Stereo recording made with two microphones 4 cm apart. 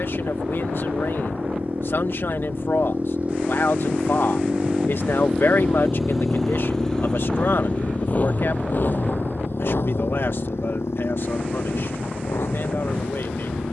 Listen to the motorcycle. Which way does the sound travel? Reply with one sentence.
You can hear the motorcycle go from the right side to the left.